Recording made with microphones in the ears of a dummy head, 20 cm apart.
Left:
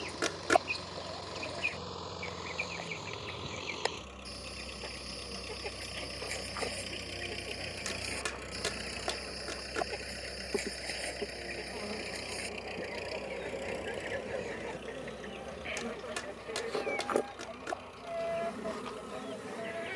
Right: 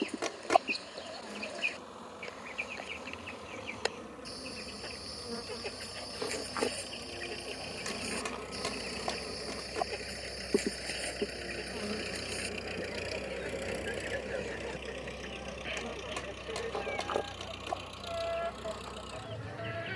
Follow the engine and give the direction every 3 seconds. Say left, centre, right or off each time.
left, left, left, centre, right, right, right.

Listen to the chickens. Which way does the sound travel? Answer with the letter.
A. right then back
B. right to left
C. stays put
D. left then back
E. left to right
C.